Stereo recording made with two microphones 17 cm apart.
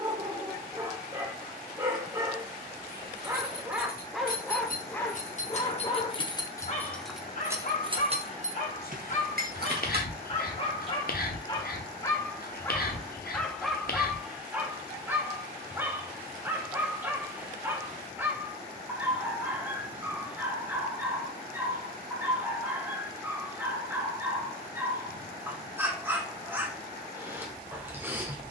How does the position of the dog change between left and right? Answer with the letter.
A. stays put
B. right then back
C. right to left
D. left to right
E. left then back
E.